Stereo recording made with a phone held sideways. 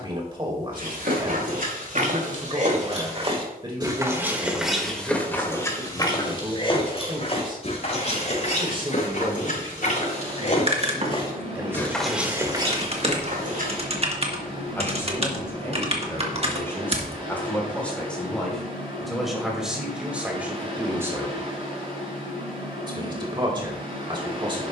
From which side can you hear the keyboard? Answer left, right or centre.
right.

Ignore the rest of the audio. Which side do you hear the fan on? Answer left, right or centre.
right.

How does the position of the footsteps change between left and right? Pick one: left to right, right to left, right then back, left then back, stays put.
left then back.